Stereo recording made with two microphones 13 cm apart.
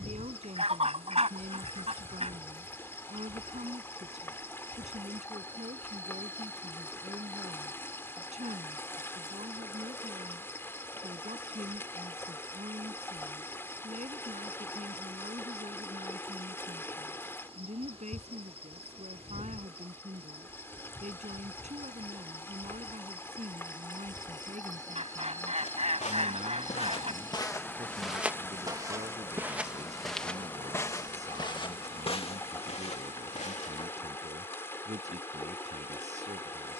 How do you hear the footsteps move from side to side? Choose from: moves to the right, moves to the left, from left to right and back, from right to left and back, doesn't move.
from left to right and back.